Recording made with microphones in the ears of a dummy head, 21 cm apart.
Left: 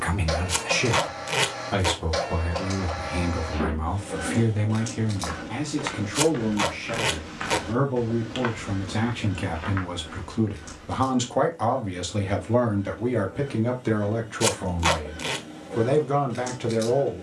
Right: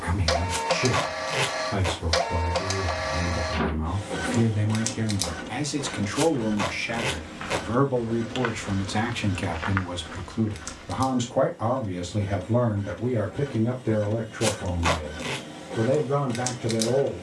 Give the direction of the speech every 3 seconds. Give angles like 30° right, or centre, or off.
50° left, 10° left, 40° right, centre, 50° left, 50° left.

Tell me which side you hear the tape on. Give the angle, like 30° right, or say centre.
20° left.